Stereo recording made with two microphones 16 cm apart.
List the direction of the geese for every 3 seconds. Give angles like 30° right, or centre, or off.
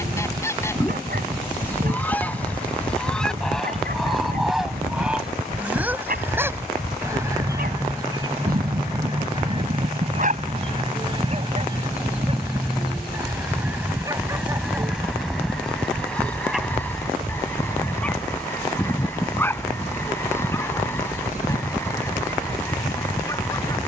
10° left, centre, 20° right, 30° right, 10° right, 10° left, 10° left, 10° left.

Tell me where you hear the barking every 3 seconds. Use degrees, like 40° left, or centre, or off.
70° right, 70° right, 70° right, 50° right, 30° right, centre, 10° left, 20° left.